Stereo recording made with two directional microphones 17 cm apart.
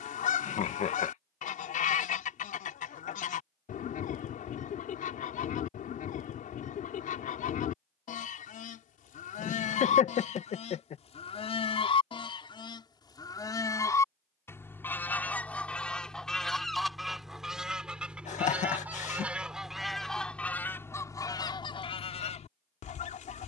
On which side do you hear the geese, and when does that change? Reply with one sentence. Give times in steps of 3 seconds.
In this clip you hear the geese on the left from 0 s, in the centre from 15 s and on the left from 21 s.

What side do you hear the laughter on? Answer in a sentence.
You can hear the laughter on the left.